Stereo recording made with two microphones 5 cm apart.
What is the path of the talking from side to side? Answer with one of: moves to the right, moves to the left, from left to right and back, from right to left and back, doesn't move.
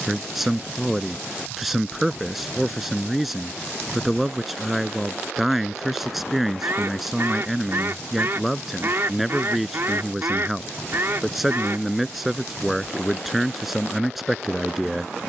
doesn't move.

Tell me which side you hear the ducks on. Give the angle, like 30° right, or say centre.
50° right.